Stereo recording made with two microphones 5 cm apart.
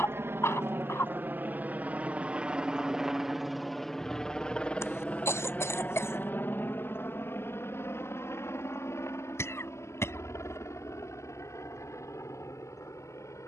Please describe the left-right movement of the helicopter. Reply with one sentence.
In this clip you hear the helicopter move from right to left.